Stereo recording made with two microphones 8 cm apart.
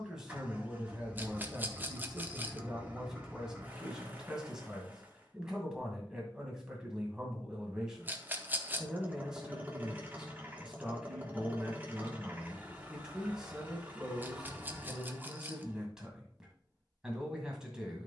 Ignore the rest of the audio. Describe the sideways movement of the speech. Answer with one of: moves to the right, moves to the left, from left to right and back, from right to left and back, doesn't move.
doesn't move.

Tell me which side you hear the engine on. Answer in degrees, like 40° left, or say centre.
20° right.